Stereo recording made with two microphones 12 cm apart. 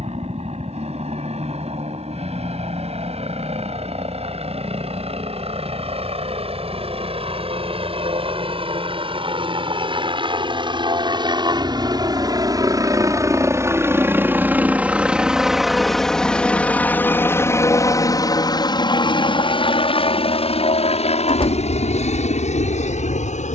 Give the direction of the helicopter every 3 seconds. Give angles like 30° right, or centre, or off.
60° right, 60° right, 50° right, 40° right, 20° right, 10° left, 40° left, 60° left.